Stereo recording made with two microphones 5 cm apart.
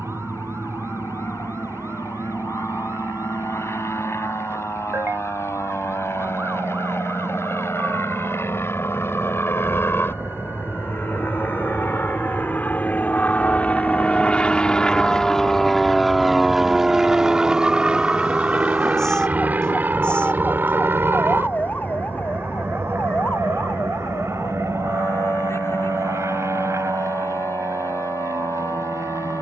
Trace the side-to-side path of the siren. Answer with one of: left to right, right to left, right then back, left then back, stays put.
right to left.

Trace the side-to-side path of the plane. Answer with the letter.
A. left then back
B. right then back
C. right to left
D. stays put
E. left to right
E.